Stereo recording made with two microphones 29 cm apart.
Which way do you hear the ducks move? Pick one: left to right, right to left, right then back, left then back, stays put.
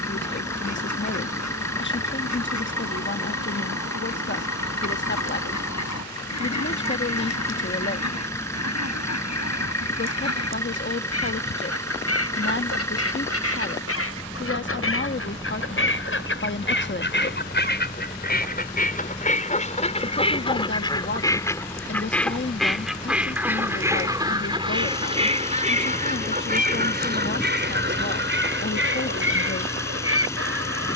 left to right.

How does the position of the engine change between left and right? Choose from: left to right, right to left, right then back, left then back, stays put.
stays put.